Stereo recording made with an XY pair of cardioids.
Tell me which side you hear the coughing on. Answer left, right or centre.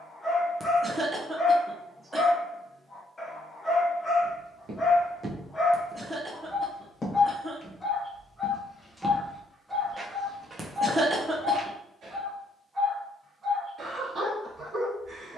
right.